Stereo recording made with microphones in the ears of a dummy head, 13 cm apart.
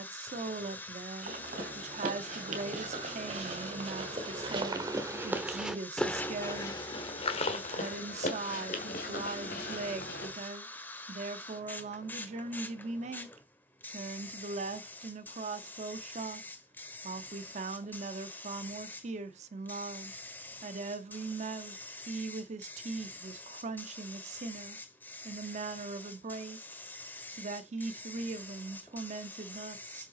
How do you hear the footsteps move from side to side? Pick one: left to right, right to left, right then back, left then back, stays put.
right to left.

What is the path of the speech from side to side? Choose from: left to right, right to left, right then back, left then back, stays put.
stays put.